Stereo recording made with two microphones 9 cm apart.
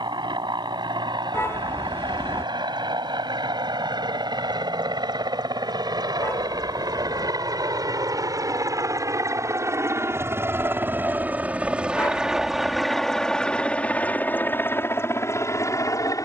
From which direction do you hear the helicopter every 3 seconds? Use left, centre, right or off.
right, right, right, right, centre, left.